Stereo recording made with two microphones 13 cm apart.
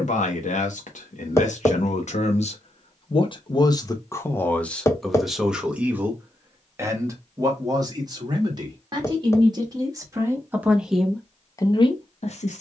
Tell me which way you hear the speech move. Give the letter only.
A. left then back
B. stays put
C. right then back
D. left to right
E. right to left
C.